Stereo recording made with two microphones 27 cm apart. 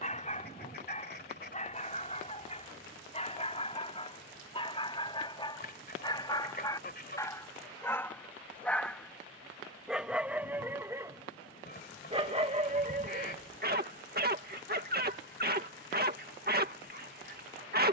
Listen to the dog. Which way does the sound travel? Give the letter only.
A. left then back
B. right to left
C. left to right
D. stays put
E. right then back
C.